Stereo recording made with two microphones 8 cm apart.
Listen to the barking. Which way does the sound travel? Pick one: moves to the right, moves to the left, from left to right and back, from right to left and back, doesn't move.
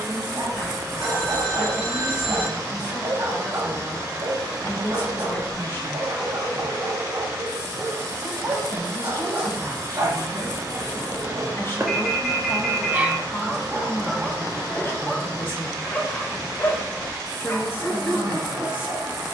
moves to the left.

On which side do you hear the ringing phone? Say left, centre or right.
centre.